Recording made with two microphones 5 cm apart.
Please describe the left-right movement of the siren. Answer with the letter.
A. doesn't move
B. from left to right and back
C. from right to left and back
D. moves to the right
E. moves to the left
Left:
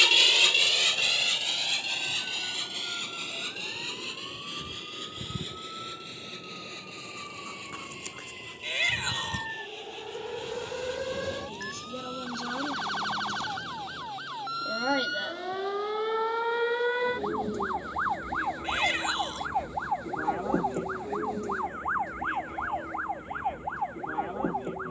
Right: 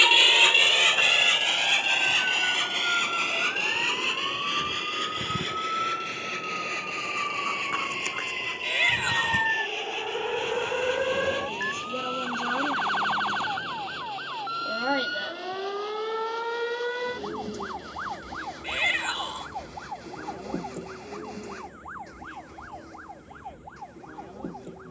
E.